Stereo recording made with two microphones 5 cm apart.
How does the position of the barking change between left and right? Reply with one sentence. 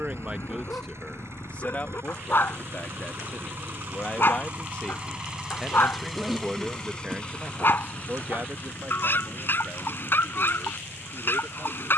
You can hear the barking stay in one place.